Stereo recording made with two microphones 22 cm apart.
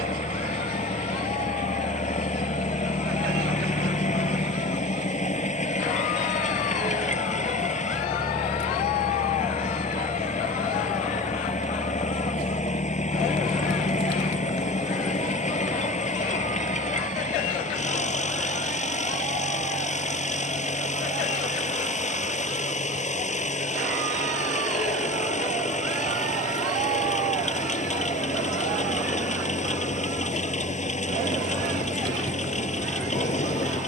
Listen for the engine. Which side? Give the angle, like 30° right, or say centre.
30° left.